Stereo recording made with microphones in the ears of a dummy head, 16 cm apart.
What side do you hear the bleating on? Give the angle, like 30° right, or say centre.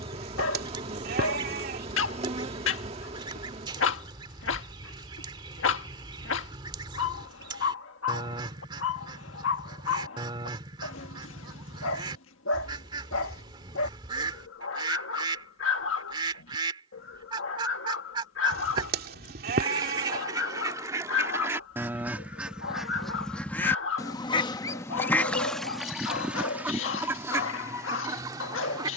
50° right.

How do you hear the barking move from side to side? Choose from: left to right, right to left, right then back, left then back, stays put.
stays put.